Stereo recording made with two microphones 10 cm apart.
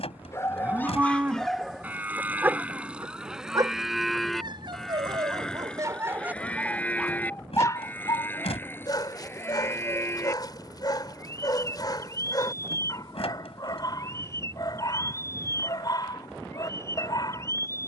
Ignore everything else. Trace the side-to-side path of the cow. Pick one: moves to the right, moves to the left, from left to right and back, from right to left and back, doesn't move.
moves to the left.